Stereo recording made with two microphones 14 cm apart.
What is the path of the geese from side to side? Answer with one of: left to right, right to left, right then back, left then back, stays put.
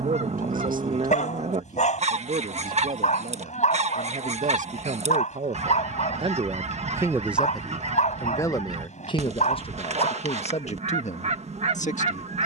stays put.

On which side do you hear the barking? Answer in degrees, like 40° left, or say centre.
60° left.